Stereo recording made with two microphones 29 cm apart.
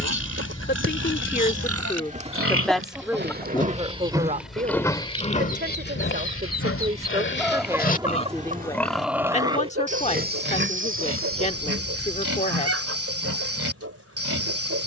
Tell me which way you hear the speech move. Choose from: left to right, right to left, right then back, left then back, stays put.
right then back.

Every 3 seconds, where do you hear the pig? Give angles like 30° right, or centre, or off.
60° right, centre, 30° left, 40° right, 50° right.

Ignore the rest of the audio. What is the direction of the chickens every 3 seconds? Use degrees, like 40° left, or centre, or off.
30° right, 30° left, centre, 50° right, 50° right.